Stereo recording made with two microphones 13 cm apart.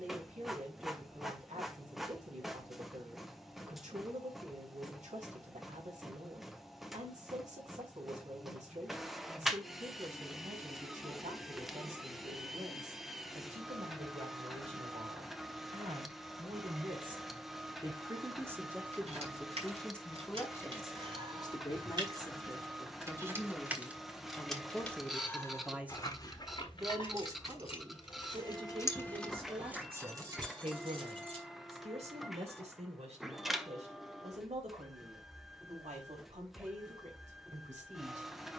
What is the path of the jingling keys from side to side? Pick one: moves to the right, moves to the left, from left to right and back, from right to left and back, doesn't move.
from right to left and back.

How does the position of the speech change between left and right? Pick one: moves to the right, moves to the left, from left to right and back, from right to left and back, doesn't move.
from right to left and back.